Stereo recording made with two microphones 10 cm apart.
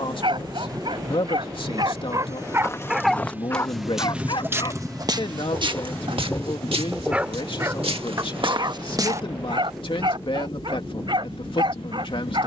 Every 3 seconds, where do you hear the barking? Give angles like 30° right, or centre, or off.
50° right, 40° left, 20° right, 50° right.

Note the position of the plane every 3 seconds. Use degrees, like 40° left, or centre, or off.
40° right, centre, 30° left, 50° left.